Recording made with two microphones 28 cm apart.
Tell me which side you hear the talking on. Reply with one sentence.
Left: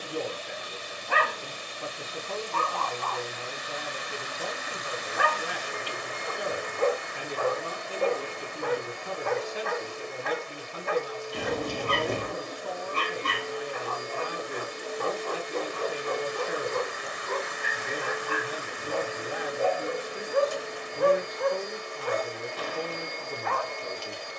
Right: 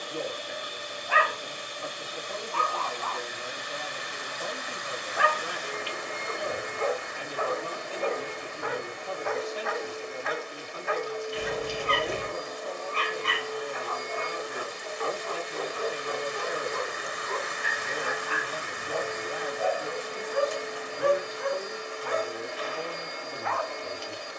In this clip you hear the talking on the left.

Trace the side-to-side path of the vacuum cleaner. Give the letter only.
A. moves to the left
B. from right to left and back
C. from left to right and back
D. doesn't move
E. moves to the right
B.